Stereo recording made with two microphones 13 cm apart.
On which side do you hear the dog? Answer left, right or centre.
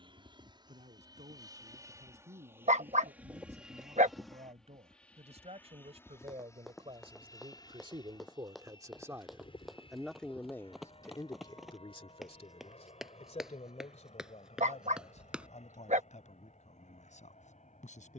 right.